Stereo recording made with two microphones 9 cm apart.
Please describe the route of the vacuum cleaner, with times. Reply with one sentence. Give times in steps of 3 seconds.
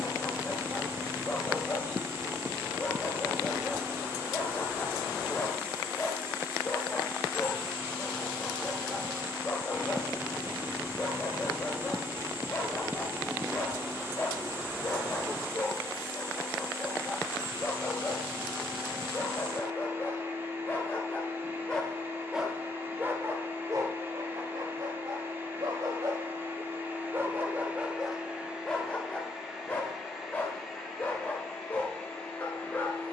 You can hear the vacuum cleaner on the right from 0 s and in the centre from 27 s.